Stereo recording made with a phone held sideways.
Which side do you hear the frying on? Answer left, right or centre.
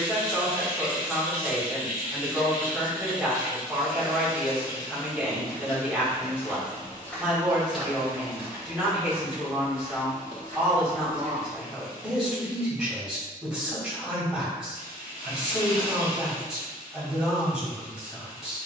left.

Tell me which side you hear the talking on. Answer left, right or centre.
centre.